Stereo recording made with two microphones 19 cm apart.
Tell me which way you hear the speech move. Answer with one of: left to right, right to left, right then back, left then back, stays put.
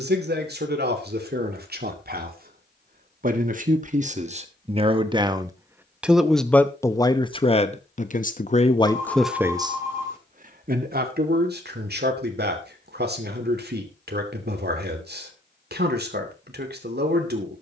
left then back.